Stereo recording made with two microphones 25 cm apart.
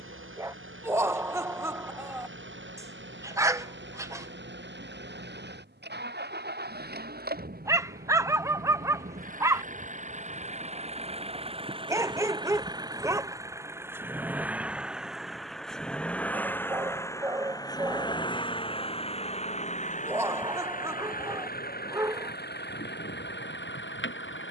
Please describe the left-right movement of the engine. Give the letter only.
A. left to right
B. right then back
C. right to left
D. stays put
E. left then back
C.